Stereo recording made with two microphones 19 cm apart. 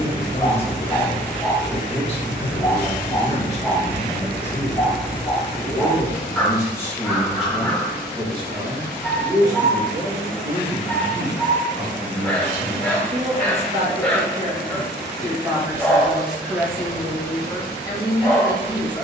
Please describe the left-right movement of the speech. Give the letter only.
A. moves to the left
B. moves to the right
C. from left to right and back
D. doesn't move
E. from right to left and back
C.